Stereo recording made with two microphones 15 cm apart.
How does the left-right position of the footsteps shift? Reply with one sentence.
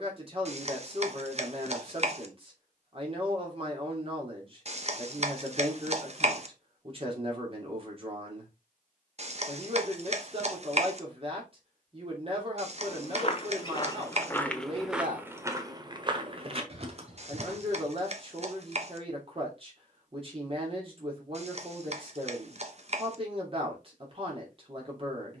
You can hear the footsteps travel towards the right.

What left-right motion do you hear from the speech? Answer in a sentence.
You can hear the speech stay put.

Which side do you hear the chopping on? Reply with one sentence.
In this clip you hear the chopping on the right.